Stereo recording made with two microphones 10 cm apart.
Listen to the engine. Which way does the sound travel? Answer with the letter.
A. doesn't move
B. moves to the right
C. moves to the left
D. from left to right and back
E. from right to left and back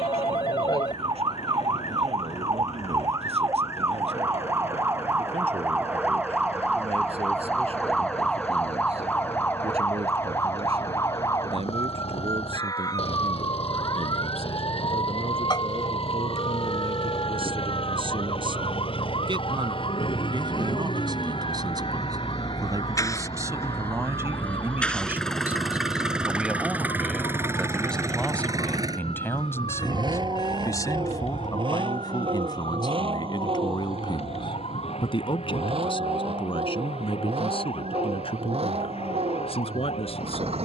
B.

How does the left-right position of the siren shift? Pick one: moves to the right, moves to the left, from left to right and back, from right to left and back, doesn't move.
moves to the left.